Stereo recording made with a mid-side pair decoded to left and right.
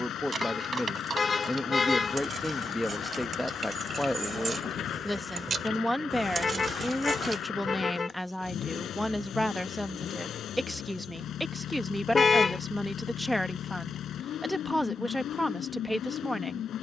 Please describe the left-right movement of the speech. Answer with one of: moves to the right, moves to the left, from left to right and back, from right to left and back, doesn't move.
doesn't move.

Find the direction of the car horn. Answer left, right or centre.
left.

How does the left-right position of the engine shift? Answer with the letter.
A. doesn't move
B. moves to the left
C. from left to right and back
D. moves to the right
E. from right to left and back
A.